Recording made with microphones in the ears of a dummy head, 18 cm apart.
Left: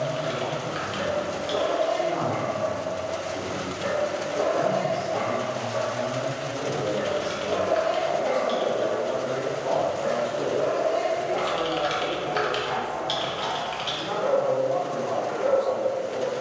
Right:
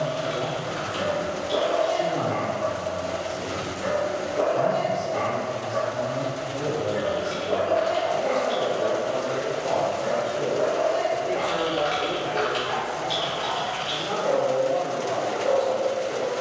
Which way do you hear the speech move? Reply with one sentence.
You can hear the speech go left and come back.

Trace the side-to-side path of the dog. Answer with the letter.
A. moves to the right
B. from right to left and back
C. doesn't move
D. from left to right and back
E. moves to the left
E.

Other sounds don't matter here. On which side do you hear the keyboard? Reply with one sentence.
In this clip you hear the keyboard on the left.